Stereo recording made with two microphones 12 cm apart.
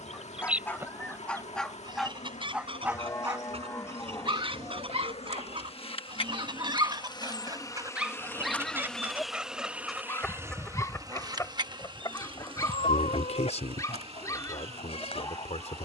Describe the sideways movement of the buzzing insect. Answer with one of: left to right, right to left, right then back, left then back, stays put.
left to right.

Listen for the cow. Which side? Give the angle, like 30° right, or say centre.
30° left.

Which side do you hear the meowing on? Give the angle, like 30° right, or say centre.
70° left.